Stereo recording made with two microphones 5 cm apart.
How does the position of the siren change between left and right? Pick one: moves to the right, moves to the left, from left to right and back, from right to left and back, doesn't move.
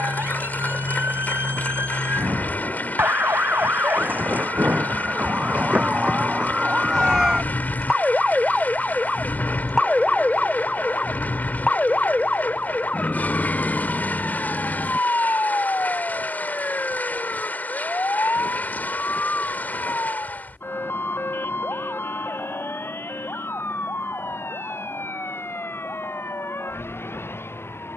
moves to the left.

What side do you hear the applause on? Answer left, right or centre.
left.